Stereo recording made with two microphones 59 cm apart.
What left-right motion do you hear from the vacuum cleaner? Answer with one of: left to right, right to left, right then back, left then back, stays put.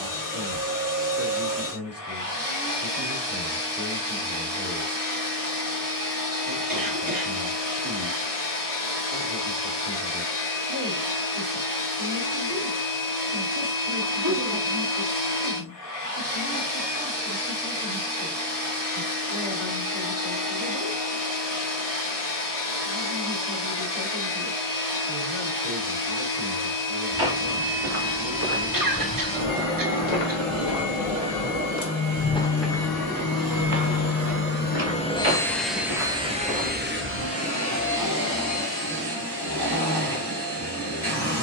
left to right.